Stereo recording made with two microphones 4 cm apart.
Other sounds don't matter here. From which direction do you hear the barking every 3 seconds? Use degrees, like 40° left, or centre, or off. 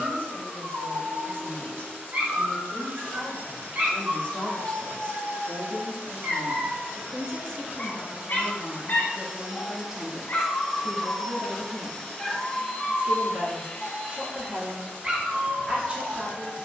50° right, 50° right, 10° left, 40° left, centre, 40° right.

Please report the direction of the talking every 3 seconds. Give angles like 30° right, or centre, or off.
50° left, 40° left, 10° left, 20° right, 30° right, 30° right.